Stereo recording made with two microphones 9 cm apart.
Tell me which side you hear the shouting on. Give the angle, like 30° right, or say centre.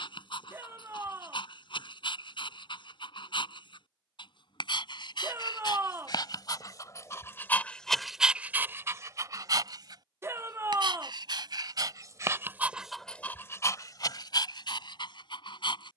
30° right.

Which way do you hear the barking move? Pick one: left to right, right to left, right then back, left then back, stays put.
right then back.